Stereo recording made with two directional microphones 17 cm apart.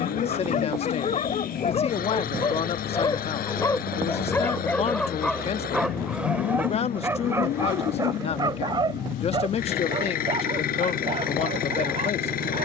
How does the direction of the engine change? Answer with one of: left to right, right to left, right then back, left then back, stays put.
stays put.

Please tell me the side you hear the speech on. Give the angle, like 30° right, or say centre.
40° left.